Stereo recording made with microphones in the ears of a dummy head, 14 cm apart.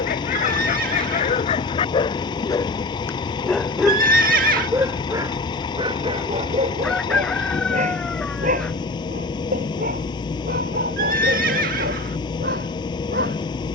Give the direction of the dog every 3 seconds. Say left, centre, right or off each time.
left, centre, right, right, right.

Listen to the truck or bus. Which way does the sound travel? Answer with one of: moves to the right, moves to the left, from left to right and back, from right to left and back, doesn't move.
doesn't move.